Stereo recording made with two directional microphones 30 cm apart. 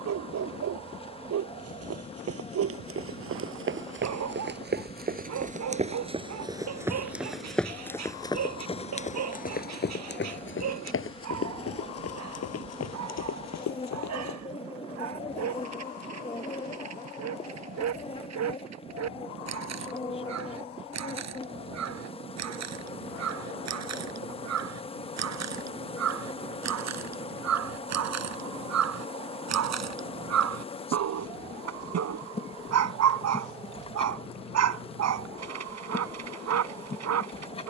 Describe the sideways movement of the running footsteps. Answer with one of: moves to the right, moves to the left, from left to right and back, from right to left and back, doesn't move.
moves to the left.